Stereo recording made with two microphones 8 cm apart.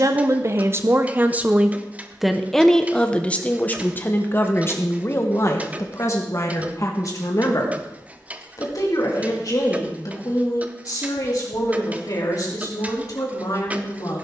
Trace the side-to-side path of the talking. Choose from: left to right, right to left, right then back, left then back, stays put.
right to left.